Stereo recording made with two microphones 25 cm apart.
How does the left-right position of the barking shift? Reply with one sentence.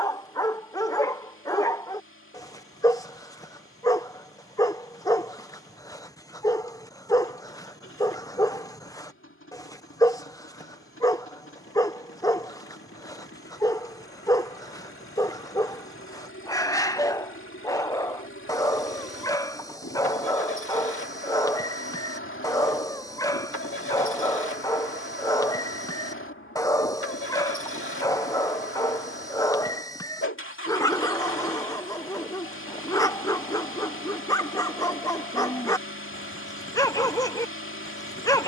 You can hear the barking stay put.